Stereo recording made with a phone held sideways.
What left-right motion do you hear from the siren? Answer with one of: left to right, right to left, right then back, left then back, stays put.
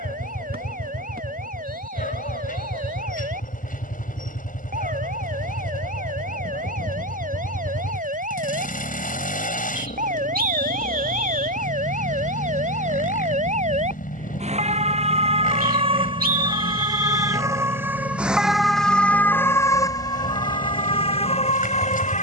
right to left.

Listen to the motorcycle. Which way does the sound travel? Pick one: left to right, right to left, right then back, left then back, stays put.
stays put.